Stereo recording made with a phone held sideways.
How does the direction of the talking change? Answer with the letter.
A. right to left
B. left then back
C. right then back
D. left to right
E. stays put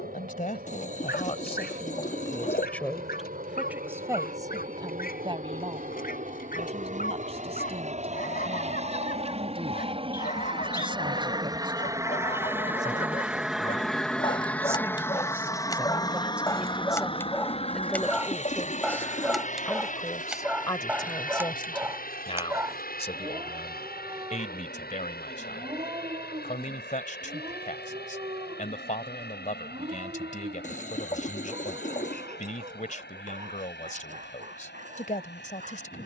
C.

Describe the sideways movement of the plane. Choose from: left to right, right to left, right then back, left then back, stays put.
right to left.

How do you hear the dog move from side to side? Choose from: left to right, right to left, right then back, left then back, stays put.
left to right.